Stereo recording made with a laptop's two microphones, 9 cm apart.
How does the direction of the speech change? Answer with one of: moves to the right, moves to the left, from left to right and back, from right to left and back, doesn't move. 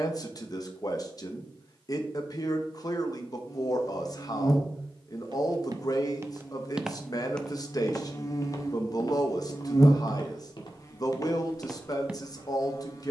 doesn't move.